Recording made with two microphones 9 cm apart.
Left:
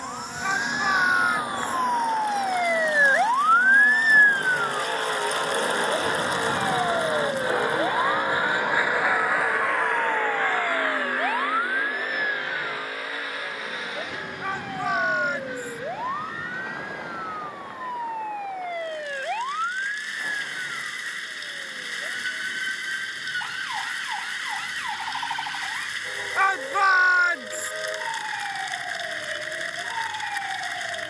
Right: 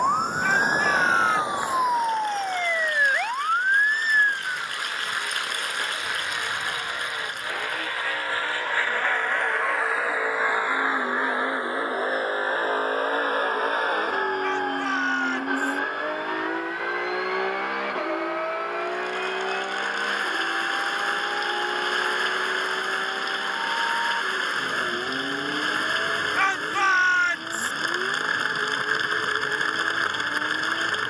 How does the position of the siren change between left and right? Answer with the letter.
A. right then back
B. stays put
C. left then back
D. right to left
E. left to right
D.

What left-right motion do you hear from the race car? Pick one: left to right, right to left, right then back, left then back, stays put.
left to right.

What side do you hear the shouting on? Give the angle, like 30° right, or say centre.
10° left.